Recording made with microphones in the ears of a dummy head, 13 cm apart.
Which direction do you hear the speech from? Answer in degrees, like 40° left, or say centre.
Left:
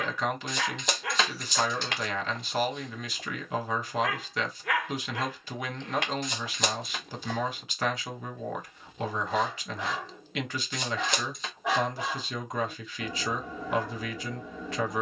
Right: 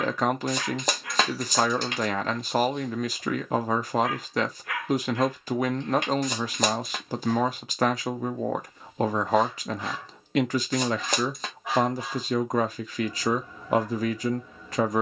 40° right.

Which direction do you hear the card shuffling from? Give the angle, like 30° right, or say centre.
40° right.